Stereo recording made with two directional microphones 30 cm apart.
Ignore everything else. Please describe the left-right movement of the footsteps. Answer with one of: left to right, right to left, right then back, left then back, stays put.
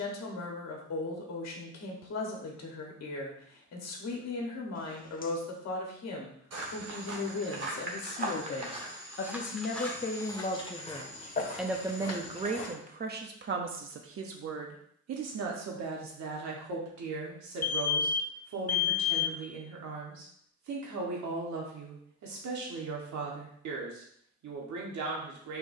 right to left.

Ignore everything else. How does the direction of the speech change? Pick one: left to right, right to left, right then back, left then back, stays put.
left to right.